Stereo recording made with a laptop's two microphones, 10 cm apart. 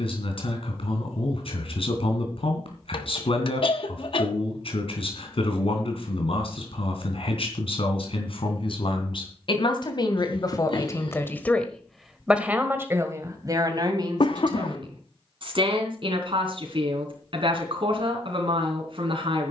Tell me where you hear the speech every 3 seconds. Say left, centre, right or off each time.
left, left, left, left, right, right, right.